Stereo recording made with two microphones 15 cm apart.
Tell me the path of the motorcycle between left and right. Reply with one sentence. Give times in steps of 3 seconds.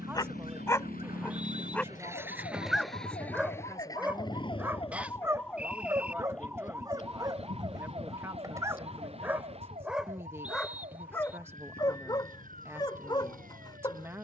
You can hear the motorcycle on the right from 0 s and on the left from 3 s.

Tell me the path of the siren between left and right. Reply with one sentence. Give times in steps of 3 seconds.
You can hear the siren on the left from 0 s and on the right from 6 s.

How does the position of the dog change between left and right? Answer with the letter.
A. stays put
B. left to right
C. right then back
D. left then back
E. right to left
C.